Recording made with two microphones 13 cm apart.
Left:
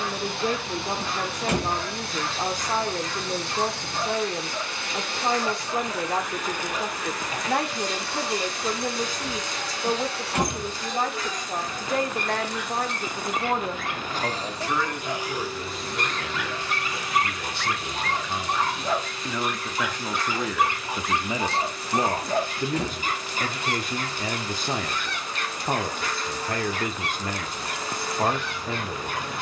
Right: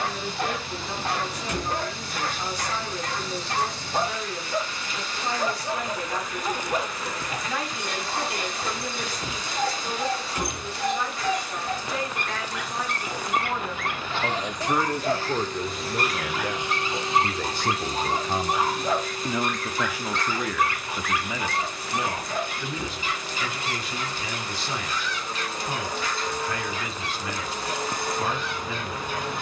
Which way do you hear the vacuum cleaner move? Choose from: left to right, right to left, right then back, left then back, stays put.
left to right.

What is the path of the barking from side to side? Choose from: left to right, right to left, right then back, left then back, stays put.
right to left.